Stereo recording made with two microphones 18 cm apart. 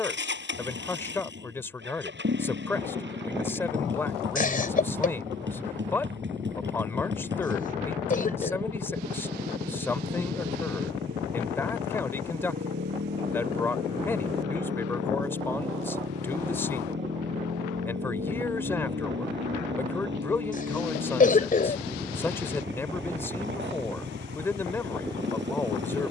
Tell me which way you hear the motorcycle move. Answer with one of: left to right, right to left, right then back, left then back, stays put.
stays put.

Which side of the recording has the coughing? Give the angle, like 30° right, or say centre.
50° left.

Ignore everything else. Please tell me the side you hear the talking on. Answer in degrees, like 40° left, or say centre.
10° left.